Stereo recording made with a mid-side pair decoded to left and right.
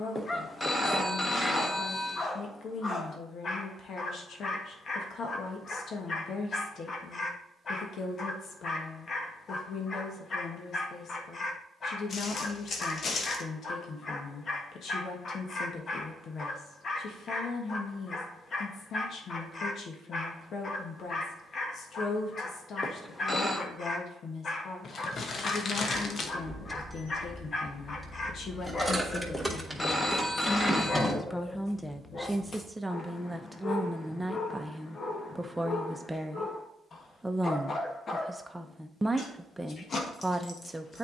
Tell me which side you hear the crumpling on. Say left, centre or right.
left.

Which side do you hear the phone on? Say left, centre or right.
left.